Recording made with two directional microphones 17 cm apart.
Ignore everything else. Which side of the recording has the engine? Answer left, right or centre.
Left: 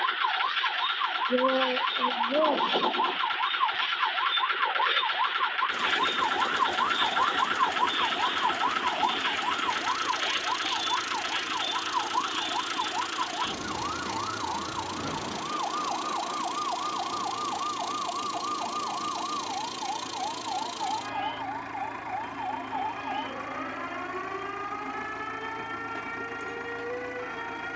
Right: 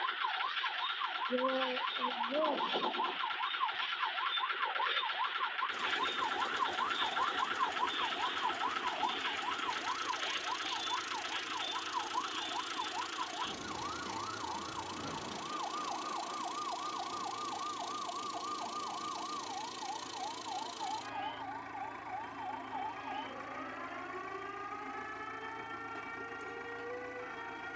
left.